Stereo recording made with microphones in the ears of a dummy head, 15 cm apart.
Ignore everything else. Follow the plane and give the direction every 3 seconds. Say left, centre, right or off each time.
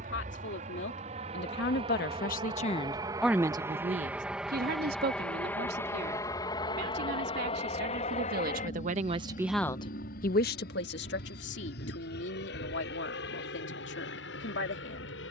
right, centre, left, left, left.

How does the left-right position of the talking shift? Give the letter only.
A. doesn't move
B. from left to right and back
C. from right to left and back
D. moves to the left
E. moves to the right
B.